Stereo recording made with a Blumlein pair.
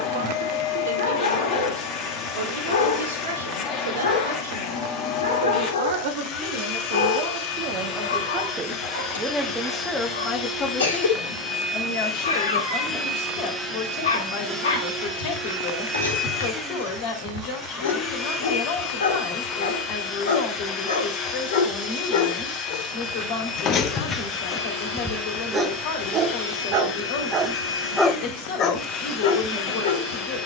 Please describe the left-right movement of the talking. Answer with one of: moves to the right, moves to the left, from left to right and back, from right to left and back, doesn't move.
moves to the left.